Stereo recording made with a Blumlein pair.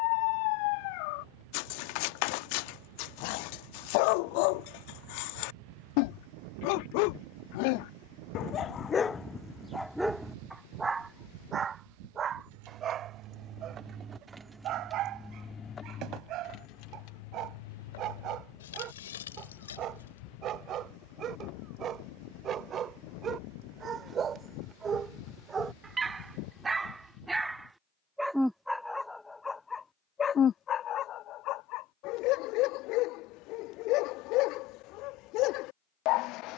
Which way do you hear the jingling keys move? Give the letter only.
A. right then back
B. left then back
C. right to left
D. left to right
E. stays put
C.